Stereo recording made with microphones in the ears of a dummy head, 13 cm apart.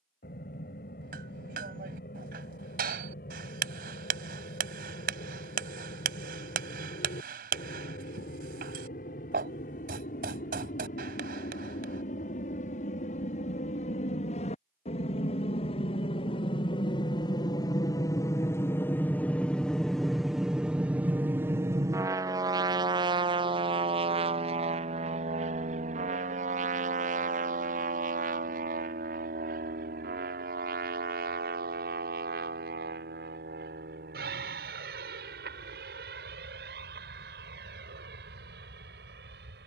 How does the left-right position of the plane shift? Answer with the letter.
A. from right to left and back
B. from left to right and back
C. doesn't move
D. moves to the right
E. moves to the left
D.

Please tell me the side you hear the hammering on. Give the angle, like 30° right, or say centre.
70° right.